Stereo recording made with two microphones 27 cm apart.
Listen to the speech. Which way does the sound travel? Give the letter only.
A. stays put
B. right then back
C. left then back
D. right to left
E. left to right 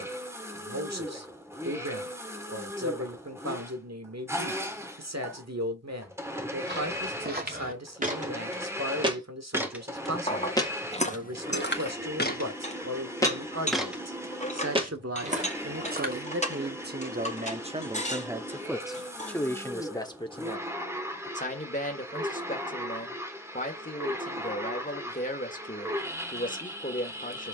D.